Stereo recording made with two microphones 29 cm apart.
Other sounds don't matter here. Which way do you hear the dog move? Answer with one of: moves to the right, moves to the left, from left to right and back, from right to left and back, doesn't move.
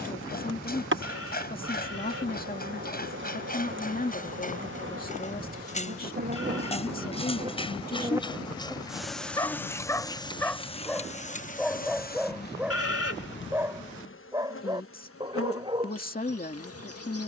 moves to the right.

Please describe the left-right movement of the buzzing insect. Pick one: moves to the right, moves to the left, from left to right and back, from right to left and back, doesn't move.
moves to the left.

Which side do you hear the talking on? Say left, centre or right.
left.